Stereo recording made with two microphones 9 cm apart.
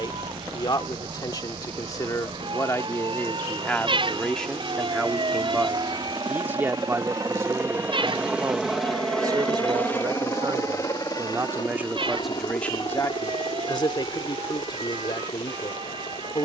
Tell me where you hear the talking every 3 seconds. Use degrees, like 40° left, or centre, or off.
40° left, 10° left, 30° right, 40° right, 30° left, 50° left.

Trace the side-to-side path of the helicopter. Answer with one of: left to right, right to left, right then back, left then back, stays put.
right to left.